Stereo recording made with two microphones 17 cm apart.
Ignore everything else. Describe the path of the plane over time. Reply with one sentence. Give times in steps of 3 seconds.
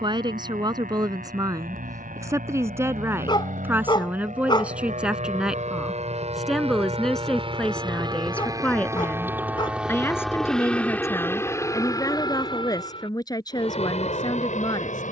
You can hear the plane on the right from 0 s, in the centre from 9 s and on the left from 12 s.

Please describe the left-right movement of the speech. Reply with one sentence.
You can hear the speech travel towards the left.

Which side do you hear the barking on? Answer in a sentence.
In this clip you hear the barking on the left.